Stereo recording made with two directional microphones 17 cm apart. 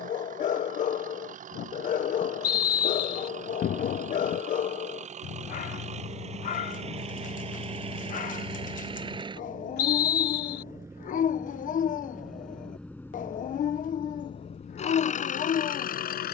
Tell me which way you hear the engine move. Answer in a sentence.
You can hear the engine move from right to left.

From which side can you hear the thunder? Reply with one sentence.
In this clip you hear the thunder on the left.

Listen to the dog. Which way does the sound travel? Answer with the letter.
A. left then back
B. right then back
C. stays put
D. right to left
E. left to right
C.